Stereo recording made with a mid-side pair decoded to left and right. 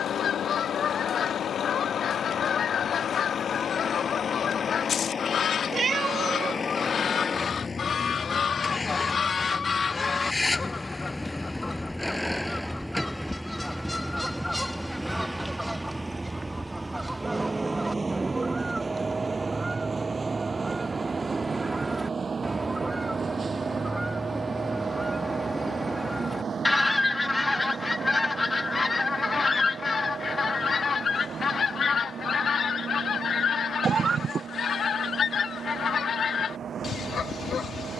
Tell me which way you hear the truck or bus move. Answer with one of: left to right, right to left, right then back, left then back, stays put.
left to right.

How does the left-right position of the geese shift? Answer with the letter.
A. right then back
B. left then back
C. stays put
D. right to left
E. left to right
A.